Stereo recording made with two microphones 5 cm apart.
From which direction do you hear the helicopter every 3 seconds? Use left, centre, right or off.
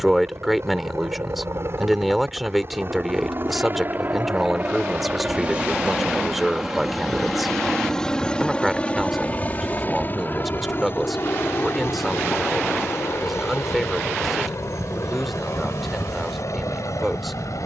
right, right, centre, left, left, left.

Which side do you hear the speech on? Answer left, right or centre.
centre.